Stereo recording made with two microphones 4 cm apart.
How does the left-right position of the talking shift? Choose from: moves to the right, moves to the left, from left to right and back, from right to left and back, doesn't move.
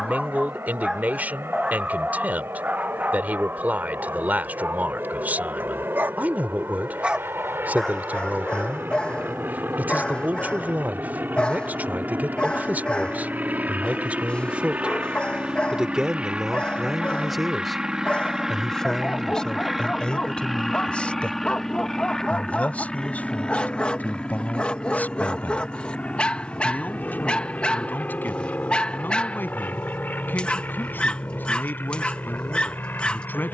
moves to the left.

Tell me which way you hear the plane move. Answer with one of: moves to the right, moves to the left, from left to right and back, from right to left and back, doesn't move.
moves to the left.